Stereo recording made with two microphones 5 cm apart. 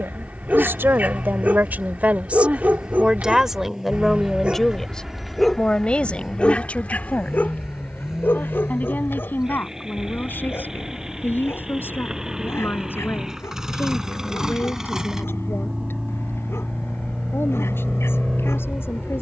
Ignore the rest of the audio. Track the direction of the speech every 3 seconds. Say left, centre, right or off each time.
right, centre, left, left, left, left, left.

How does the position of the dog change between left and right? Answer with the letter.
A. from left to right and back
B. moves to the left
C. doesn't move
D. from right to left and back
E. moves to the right
B.